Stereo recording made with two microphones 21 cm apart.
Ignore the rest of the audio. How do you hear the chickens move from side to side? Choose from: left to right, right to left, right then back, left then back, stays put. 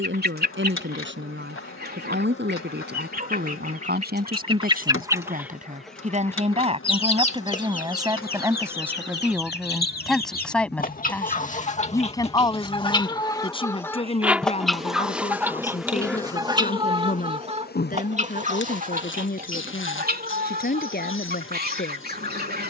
left then back.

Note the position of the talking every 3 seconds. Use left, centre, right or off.
right, right, right, centre, left, left, left, left.